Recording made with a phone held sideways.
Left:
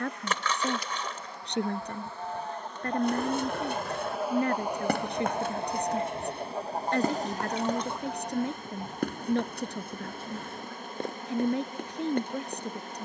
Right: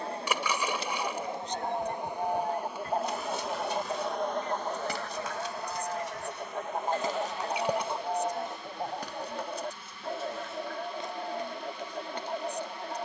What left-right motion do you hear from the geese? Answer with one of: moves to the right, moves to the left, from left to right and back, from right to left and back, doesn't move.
from right to left and back.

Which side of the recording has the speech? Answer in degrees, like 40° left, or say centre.
70° left.